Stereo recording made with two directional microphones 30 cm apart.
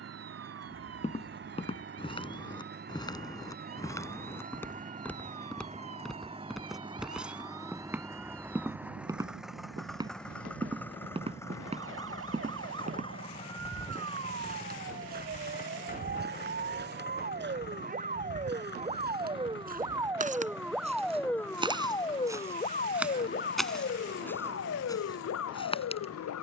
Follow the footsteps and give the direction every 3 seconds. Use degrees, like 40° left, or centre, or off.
20° left, 10° left, centre, 20° right, 30° right, 40° right, 30° right, 10° right, 10° left.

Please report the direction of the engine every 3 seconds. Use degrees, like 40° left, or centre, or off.
40° right, 30° right, 10° right, centre, 20° left, 30° left, 40° left, 50° left, 50° left.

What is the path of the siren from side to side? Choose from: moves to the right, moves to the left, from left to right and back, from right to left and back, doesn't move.
moves to the left.